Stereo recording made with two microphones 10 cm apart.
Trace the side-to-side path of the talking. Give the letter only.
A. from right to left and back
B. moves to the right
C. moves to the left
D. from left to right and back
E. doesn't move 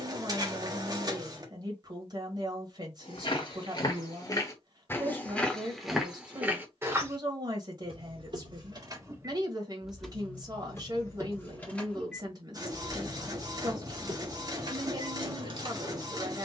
E.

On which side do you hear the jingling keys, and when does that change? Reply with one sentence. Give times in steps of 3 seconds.
In this clip you hear the jingling keys not at all from 0 s, on the right from 6 s, in the centre from 9 s and on the right from 12 s.